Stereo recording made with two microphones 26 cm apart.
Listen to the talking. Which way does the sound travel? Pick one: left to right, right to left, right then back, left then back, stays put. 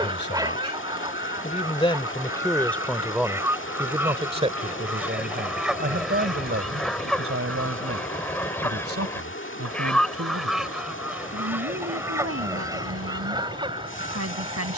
left to right.